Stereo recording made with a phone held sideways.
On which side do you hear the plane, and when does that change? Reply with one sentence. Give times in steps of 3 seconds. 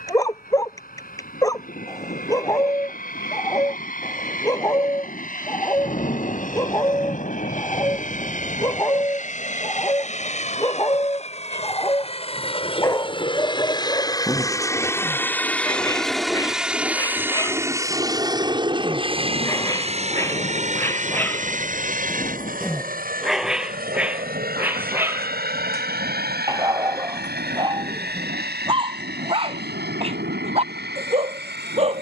You can hear the plane on the left from 0 s, in the centre from 15 s and on the right from 18 s.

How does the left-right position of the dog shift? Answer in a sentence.
You can hear the dog go from the left side to the right.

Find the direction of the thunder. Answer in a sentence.
In this clip you hear the thunder on the left.